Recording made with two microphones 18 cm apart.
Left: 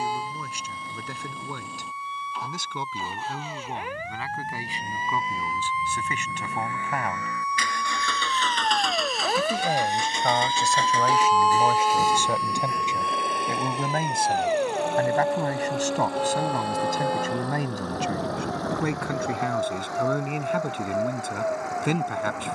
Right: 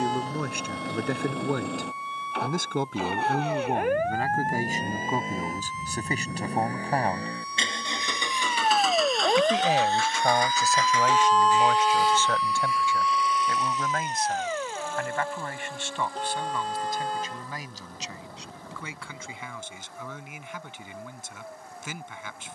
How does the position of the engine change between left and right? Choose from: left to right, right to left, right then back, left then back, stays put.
right to left.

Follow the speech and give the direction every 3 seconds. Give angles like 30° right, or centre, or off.
50° right, 40° right, 30° right, centre, 20° left, 40° left, 60° left, 60° left.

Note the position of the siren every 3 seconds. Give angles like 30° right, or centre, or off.
60° right, 50° right, 40° right, 10° right, 20° left, 50° left, 60° left, 70° left.